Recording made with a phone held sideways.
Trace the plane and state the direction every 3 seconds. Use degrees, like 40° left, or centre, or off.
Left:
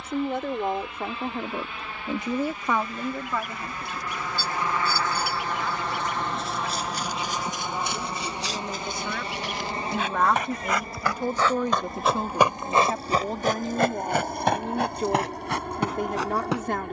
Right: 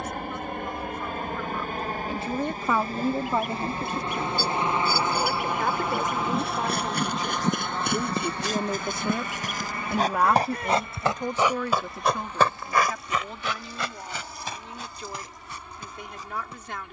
50° right, 20° right, 10° left, 30° left, 40° left, 50° left.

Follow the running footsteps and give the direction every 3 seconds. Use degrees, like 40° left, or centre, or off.
off, off, 60° right, 30° right, 40° left, 70° left.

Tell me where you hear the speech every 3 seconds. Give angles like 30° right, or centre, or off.
40° left, 40° right, 40° right, centre, 40° left, 50° left.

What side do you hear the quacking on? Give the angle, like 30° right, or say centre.
50° right.